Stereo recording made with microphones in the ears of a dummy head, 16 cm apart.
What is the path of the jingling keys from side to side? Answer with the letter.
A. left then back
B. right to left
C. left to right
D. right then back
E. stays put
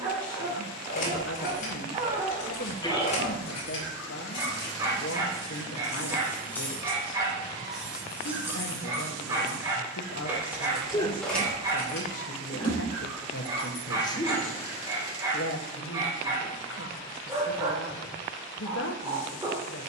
D.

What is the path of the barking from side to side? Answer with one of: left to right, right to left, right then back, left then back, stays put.
stays put.